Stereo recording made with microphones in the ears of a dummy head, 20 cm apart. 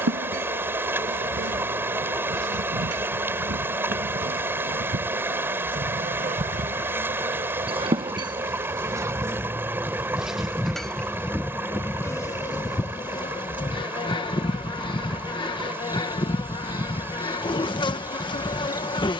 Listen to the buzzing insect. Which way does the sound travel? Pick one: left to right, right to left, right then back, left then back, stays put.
right to left.